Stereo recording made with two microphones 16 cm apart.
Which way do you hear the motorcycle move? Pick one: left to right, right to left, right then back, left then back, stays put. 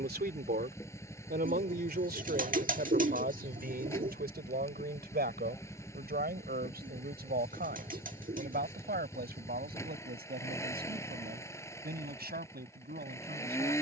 stays put.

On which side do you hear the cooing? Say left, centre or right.
right.